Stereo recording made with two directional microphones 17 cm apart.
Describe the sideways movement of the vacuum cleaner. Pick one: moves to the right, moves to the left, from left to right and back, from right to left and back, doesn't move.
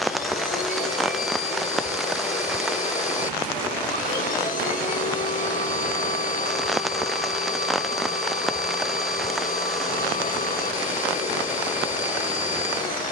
doesn't move.